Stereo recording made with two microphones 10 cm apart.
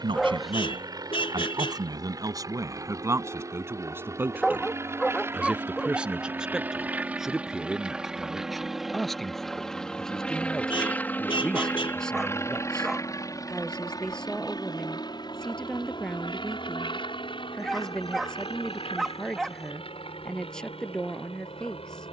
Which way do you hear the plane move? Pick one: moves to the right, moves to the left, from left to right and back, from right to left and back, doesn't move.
moves to the left.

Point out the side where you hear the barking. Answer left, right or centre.
centre.